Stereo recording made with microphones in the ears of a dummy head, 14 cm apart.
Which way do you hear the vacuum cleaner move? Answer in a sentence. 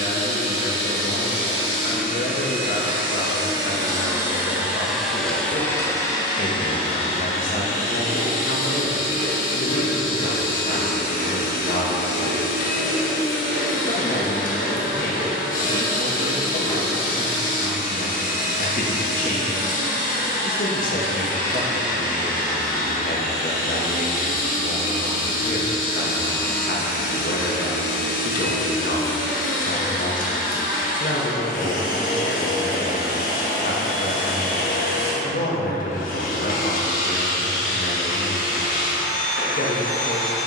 You can hear the vacuum cleaner move to the left.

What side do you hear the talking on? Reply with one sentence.
In this clip you hear the talking on the left.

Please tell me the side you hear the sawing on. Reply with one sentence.
In this clip you hear the sawing on the left.